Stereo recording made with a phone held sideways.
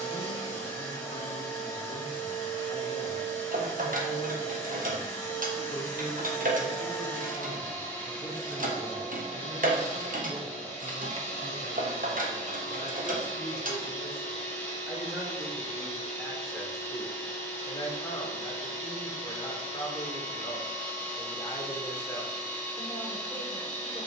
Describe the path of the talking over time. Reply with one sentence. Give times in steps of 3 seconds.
In this clip you hear the talking on the left from 0 s, on the right from 9 s, in the centre from 15 s and on the left from 18 s.